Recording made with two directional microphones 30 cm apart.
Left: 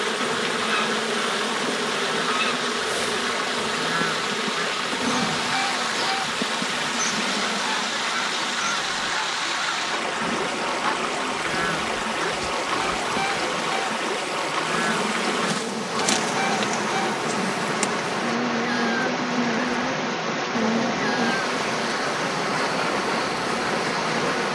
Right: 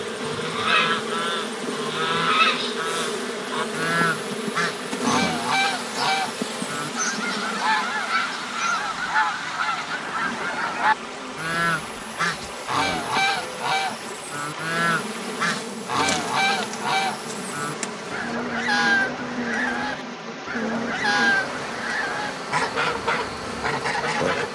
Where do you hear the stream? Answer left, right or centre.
left.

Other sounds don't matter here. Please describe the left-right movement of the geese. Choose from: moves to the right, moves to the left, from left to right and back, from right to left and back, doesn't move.
doesn't move.